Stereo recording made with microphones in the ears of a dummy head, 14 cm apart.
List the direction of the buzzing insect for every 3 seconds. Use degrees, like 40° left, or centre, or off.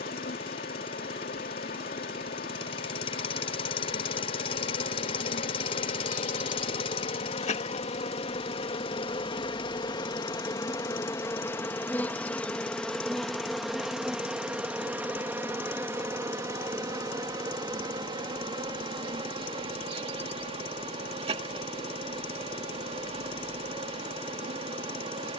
60° left, 60° left, 40° left, 20° left, centre, 20° right, 30° right, 40° right, 40° right.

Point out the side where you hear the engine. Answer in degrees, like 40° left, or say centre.
40° left.